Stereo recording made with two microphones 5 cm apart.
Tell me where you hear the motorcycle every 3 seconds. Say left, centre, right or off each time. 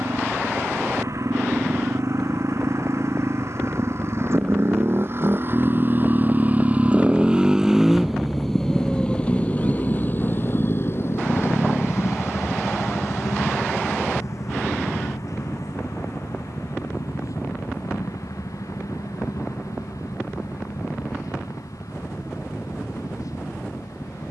right, right, centre, left, left, left, left, left.